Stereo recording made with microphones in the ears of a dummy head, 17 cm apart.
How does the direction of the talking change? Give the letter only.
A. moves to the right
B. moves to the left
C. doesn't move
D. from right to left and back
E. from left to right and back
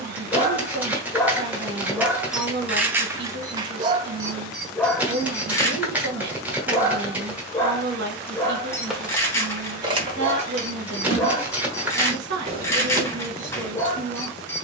C.